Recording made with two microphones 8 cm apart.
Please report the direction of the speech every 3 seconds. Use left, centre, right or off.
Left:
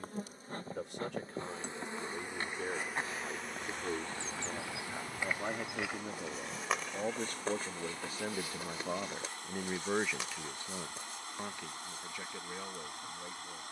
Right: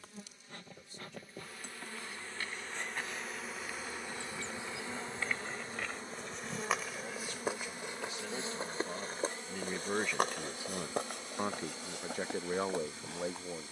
left, left, left, centre, right.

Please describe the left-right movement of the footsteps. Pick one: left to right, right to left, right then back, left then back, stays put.
left to right.